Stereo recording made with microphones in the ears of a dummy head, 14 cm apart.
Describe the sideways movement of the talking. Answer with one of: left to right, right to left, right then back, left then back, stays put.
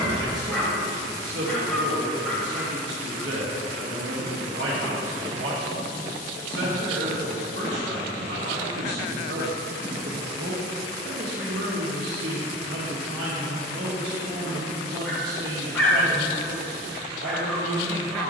stays put.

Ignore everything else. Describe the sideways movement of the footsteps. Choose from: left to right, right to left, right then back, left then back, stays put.
right to left.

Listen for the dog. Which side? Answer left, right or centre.
centre.